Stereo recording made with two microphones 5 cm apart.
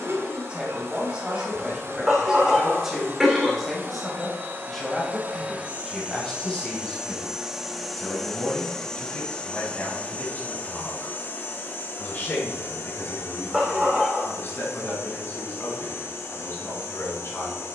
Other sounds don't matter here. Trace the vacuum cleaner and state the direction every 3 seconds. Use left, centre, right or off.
right, right, centre, left, left, left.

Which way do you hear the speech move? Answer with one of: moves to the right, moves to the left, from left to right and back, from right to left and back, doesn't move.
moves to the left.